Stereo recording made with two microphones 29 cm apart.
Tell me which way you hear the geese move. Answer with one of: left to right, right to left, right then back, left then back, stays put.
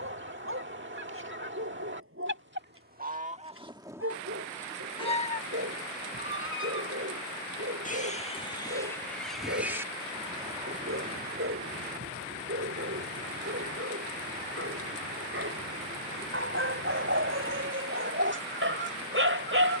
left then back.